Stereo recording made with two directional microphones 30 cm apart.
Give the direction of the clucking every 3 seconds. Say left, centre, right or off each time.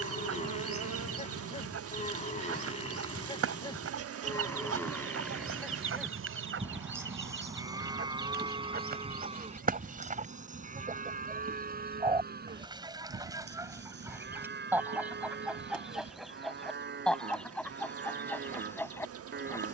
right, right, right, right, centre, centre, centre.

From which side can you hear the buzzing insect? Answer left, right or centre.
right.